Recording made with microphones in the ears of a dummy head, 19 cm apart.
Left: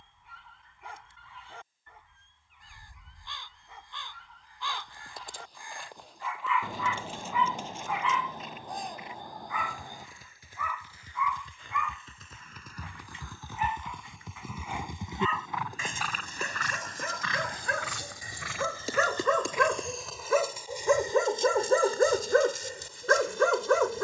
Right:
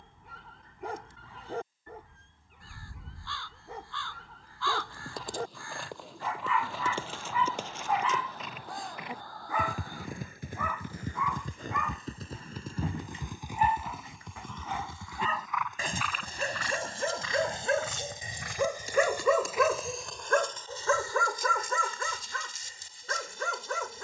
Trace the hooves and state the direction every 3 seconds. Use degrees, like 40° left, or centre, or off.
off, 70° right, 60° right, 50° right, 10° right, 40° left, 70° left, off.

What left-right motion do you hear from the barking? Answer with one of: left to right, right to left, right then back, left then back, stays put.
right to left.